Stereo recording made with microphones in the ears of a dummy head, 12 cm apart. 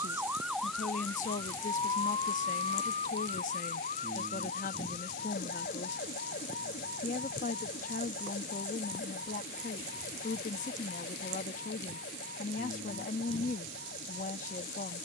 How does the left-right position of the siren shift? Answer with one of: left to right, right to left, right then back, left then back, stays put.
right to left.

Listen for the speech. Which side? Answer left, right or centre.
left.